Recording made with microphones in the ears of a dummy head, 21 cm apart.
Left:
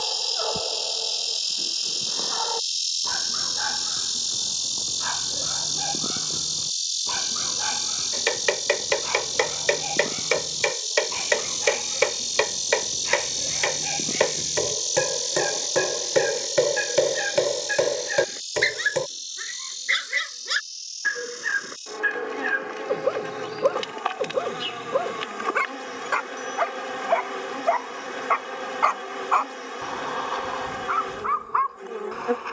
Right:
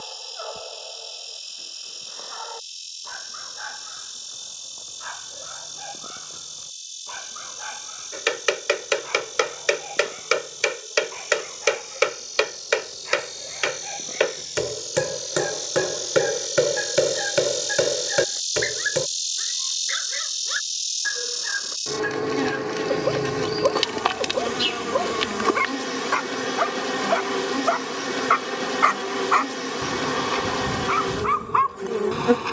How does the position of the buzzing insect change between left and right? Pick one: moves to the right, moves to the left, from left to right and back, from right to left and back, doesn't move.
moves to the right.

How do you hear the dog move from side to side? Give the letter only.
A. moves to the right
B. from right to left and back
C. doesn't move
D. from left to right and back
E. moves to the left
A.